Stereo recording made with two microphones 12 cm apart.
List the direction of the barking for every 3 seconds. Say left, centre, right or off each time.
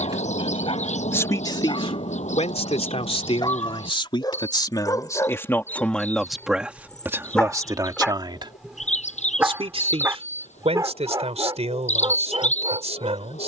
left, left, centre, right, right.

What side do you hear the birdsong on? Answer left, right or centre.
left.